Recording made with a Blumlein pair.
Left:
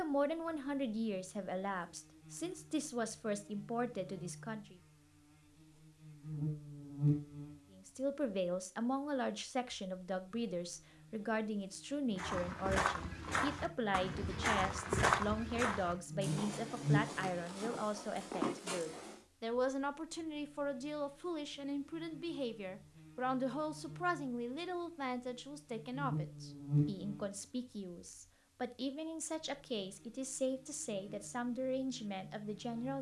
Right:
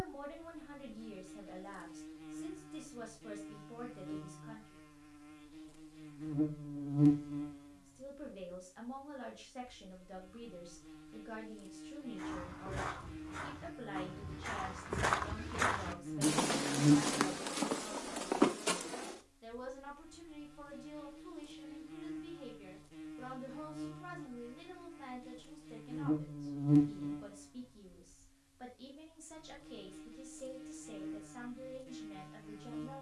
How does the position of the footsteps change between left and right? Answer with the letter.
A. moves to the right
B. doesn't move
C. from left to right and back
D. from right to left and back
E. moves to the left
A.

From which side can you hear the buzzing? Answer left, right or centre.
right.